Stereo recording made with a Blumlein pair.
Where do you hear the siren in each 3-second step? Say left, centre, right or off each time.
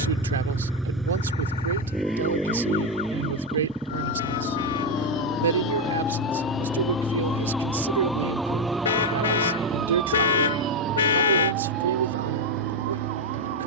left, left, centre, right, right.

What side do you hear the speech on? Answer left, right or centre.
right.